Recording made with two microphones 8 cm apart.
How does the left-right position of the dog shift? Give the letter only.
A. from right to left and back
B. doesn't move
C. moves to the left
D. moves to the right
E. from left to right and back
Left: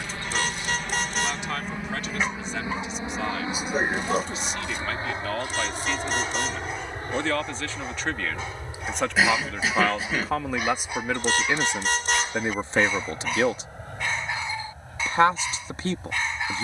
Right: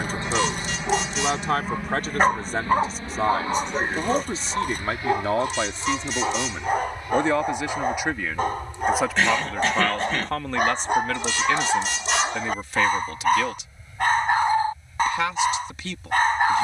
B.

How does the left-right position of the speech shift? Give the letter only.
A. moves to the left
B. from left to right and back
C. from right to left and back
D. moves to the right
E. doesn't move
A.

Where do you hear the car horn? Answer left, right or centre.
left.